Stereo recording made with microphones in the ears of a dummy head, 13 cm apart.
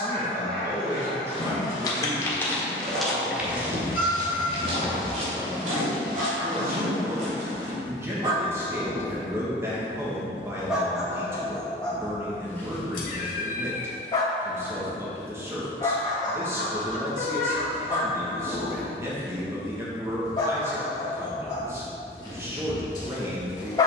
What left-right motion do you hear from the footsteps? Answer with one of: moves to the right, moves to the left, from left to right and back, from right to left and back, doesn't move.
moves to the right.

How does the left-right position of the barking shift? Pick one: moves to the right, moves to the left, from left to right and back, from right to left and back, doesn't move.
moves to the left.